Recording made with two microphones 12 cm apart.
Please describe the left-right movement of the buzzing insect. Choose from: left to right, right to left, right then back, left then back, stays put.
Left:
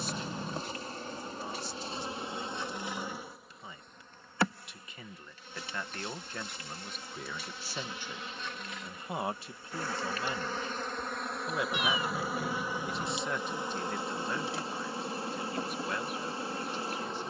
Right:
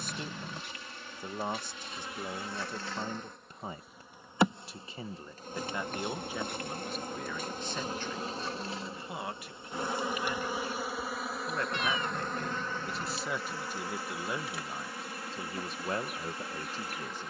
right then back.